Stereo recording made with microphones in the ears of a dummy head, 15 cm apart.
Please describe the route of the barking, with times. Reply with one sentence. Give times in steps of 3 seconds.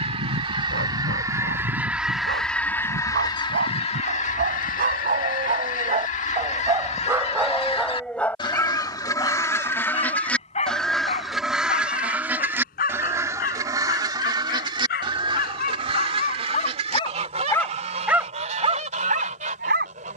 In this clip you hear the barking on the right from 0 s, in the centre from 6 s, on the left from 9 s and on the right from 18 s.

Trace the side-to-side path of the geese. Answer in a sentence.
In this clip you hear the geese move from right to left and back again.